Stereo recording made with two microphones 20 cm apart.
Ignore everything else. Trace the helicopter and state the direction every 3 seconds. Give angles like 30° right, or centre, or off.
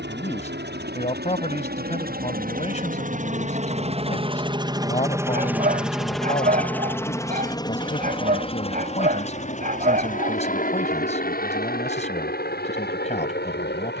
60° right, 20° right, 20° left, 40° left, 50° left.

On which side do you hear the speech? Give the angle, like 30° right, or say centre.
30° left.